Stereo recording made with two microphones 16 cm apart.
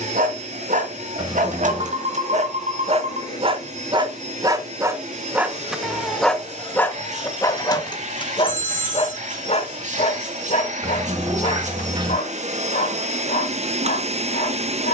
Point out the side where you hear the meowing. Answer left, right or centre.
right.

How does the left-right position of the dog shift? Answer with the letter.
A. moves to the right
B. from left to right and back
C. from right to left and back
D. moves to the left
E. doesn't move
D.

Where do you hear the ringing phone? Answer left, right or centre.
right.